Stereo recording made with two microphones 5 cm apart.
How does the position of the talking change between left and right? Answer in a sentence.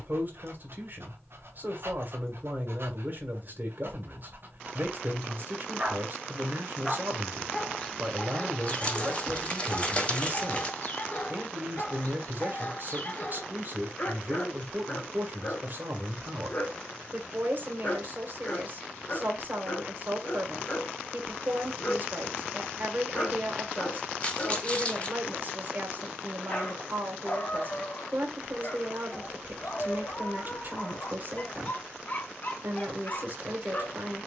In this clip you hear the talking stay in one place.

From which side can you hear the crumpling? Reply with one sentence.
You can hear the crumpling on the left.